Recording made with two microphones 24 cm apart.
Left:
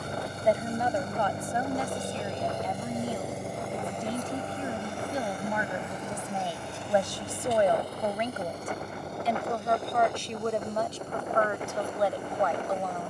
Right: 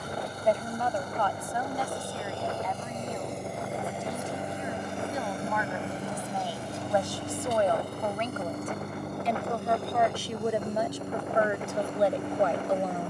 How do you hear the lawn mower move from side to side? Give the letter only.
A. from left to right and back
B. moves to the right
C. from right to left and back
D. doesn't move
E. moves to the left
B.